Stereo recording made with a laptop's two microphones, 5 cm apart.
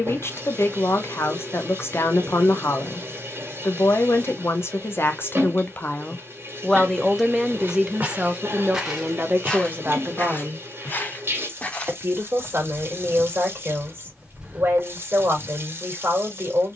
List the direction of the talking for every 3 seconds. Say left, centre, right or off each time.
left, left, centre, right, right, right.